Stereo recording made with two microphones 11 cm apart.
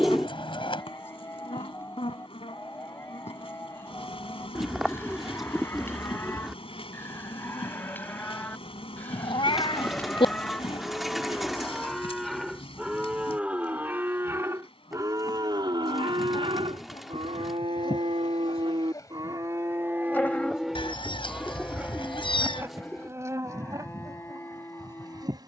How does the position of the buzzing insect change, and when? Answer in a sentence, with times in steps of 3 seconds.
In this clip you hear the buzzing insect on the left from 0 s and on the right from 21 s.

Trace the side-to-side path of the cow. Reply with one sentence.
You can hear the cow move from left to right and back again.